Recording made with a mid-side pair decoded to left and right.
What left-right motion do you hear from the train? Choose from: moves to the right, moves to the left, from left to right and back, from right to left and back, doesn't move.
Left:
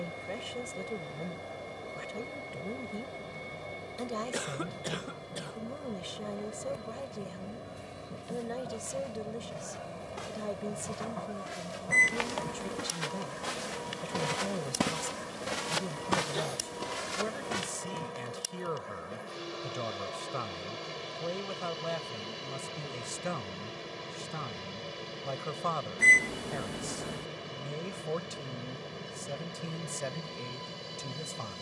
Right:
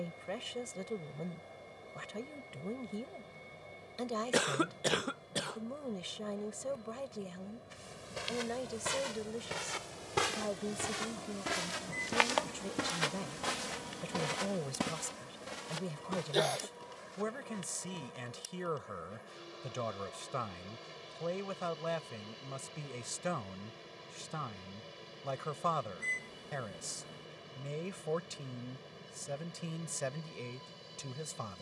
doesn't move.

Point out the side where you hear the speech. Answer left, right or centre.
centre.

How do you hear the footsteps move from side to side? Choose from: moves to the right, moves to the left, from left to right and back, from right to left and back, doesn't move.
moves to the left.